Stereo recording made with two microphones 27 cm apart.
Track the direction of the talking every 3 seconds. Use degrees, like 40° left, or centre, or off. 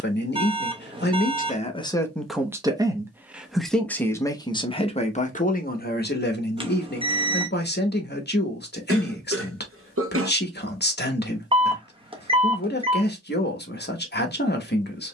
20° left, 20° left, 40° left, 40° left, 40° left.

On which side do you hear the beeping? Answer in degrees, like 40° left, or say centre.
20° right.